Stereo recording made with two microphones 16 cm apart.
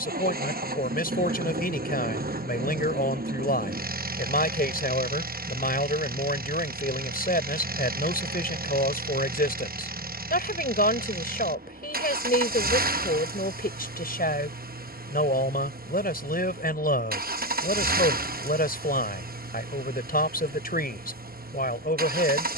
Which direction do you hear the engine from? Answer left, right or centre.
right.